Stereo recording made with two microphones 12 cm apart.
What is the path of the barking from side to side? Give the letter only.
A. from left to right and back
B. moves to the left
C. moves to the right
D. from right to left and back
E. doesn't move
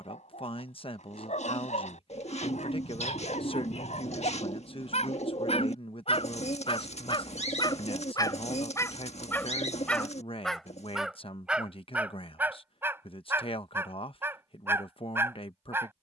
C.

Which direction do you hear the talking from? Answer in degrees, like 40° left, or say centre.
50° left.